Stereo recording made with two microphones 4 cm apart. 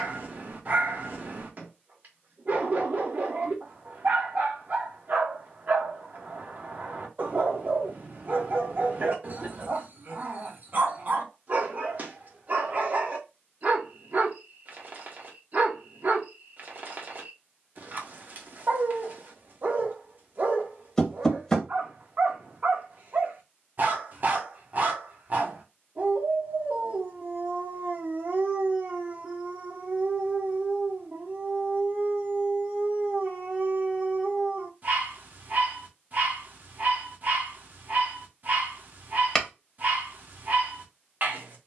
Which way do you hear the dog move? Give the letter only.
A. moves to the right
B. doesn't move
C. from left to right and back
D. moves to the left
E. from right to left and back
B.